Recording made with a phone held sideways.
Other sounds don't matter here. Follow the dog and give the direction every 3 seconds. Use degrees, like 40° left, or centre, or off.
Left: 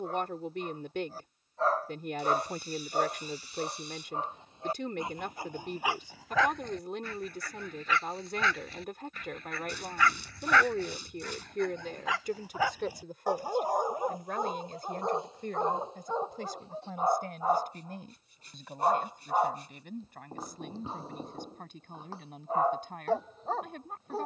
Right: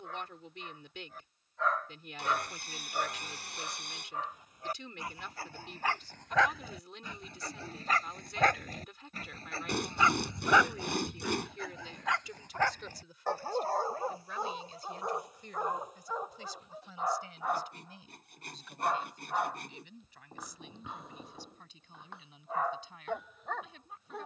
30° left, 20° left, 30° right, 20° right, 10° left, 30° left, 30° left, 30° left.